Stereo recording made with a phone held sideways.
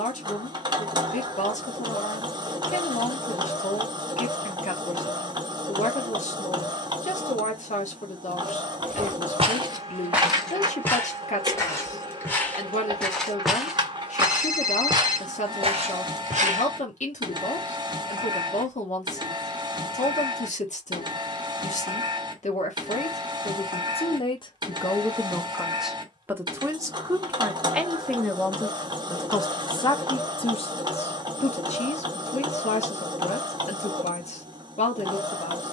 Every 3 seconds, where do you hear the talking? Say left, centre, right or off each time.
left, left, left, left, left, left, left, left, centre, centre, left, left.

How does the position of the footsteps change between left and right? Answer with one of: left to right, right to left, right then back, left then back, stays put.
left then back.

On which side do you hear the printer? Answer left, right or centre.
right.